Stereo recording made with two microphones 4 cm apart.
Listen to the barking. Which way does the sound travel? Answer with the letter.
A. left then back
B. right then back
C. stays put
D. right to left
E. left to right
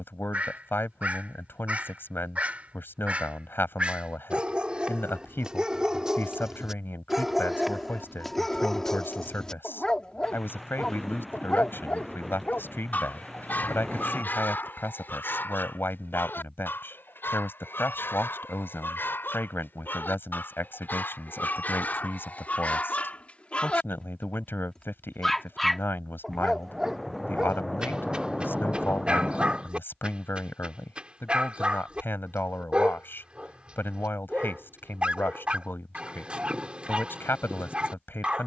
A.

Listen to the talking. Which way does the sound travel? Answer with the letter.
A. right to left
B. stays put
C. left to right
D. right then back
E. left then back
B.